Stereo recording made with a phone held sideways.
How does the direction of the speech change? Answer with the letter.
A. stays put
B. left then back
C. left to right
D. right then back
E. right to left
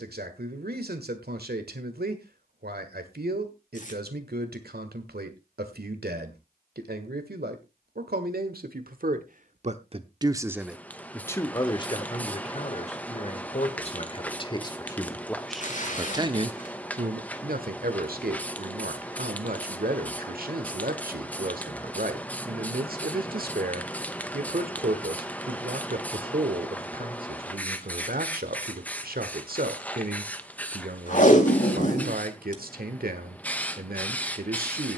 B.